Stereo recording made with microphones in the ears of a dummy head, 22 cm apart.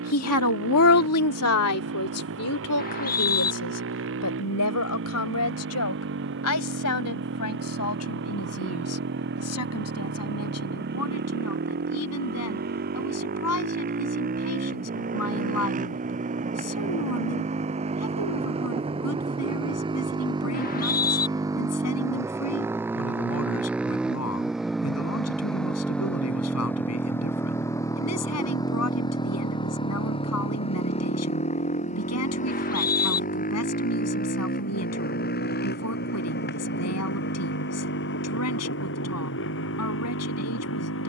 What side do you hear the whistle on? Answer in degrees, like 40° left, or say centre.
40° left.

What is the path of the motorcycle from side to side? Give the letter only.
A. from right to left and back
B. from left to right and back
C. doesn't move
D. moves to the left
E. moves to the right
D.